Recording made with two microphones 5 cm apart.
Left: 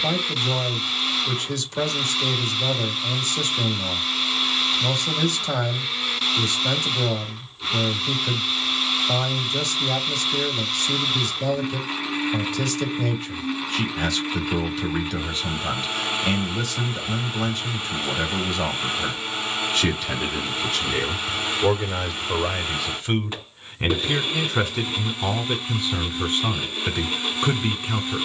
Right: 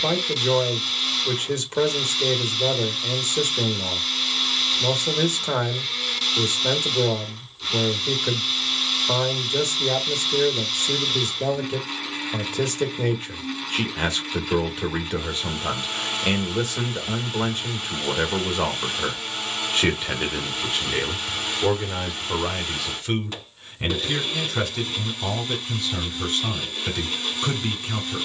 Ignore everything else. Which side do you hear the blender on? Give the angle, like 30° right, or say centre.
10° left.